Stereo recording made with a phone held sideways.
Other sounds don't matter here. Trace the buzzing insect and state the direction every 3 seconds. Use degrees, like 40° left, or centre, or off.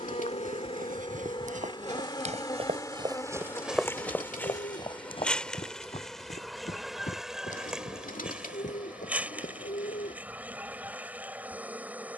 40° left, 10° left, centre, 10° right.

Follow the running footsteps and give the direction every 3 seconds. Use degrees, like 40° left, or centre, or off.
60° right, 20° left, 60° left, 70° left.